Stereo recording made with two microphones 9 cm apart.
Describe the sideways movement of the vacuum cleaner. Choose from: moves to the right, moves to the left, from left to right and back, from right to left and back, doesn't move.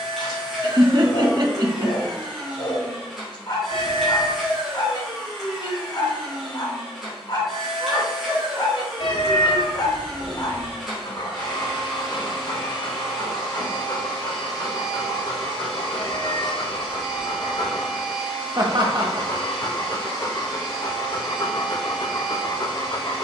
doesn't move.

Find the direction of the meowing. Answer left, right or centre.
left.